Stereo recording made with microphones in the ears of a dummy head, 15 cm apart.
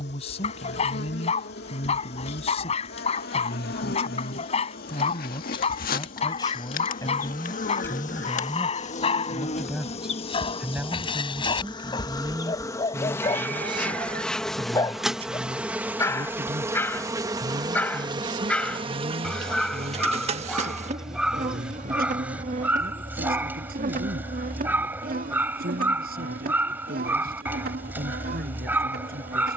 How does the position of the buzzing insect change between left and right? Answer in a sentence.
You can hear the buzzing insect move from left to right.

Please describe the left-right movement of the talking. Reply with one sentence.
You can hear the talking move from left to right.